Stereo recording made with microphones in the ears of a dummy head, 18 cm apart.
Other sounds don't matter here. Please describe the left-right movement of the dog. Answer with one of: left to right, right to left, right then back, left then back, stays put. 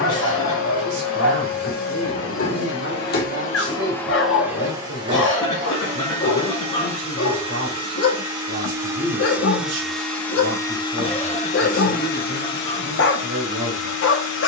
stays put.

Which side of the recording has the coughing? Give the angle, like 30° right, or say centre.
20° left.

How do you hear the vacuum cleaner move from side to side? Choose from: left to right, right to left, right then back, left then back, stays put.
right then back.